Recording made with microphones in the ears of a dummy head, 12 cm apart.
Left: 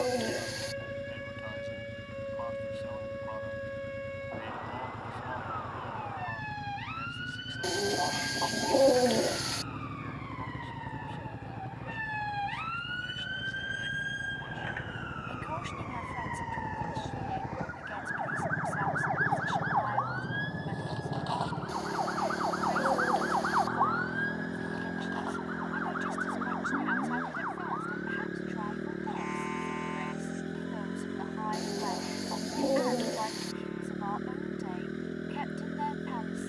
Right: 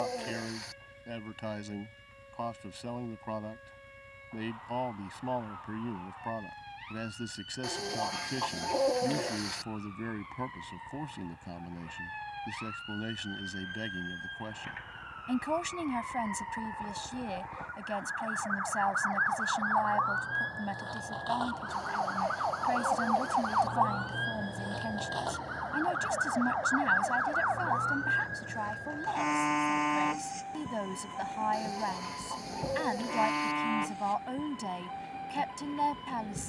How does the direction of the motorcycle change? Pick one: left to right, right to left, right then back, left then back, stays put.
stays put.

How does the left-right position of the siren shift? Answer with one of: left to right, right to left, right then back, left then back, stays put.
left to right.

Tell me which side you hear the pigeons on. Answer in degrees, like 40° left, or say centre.
30° left.